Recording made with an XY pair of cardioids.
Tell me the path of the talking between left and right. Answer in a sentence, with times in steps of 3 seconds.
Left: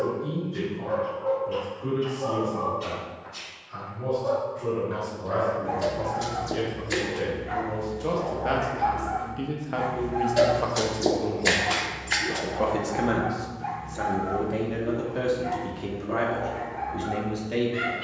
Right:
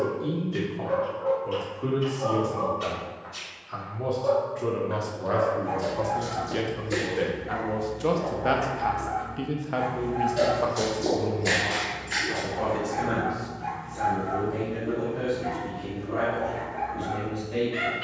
In this clip you hear the talking on the right from 0 s, in the centre from 9 s and on the left from 12 s.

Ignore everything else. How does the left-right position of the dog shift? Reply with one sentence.
You can hear the dog move from right to left and back again.